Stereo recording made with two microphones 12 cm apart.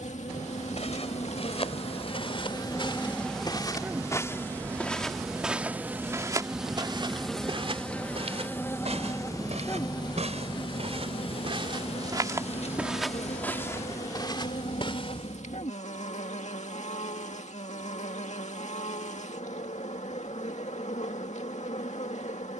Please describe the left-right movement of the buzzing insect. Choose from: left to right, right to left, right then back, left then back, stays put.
right then back.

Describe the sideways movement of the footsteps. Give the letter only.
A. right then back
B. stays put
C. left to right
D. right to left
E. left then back
A.